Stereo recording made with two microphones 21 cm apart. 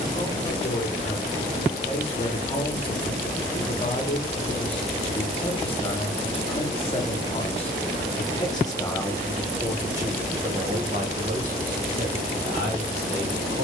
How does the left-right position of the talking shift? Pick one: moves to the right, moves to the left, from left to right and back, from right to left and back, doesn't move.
moves to the right.